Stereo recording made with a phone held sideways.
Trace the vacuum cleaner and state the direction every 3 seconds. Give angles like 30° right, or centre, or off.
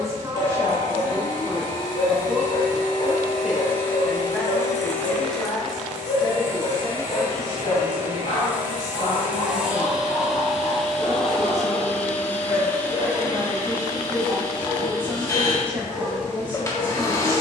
30° left, 20° left, 20° right, centre, 20° left, 20° left.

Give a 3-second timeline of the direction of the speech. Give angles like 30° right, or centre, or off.
20° right, 10° left, 40° left, 40° left, 10° right, 20° right.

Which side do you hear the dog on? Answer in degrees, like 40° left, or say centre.
60° left.